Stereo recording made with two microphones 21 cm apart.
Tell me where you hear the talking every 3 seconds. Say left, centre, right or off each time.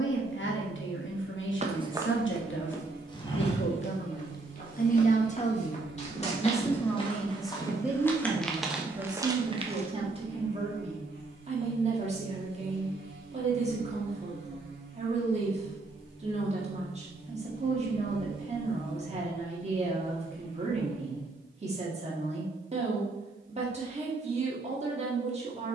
left, left, centre, right, right, right, right, right, right.